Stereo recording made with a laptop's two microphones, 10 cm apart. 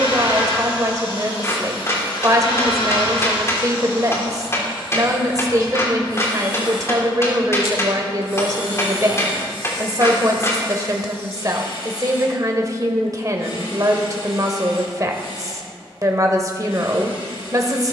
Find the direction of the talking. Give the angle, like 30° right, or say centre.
40° right.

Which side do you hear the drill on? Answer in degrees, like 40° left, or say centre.
60° left.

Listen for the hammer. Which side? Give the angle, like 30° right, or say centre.
30° left.